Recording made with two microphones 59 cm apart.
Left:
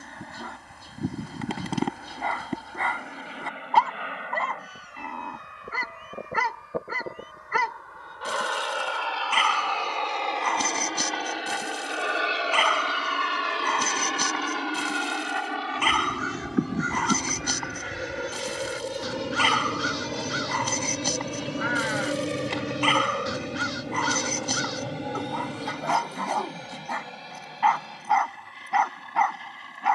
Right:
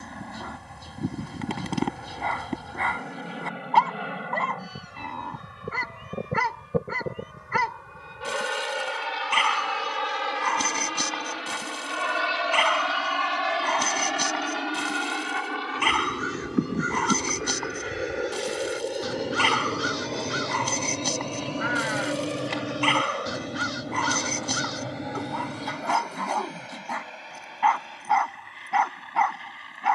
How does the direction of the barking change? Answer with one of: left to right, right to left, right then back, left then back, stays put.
stays put.